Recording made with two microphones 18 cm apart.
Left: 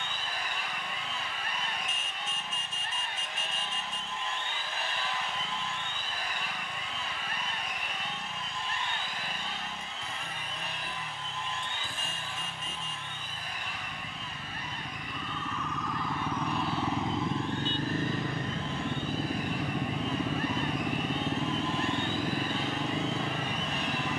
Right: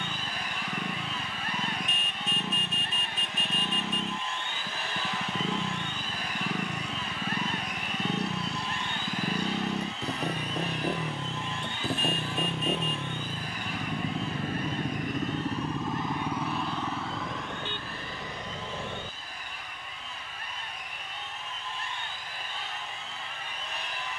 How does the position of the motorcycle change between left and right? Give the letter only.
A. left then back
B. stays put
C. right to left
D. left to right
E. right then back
C.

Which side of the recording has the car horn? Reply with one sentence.
In this clip you hear the car horn on the right.